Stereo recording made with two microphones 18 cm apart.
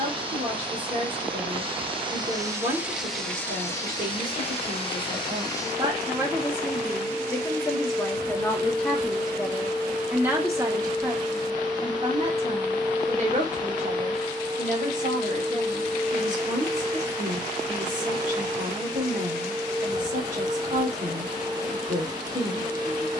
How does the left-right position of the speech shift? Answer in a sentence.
In this clip you hear the speech move from right to left and back again.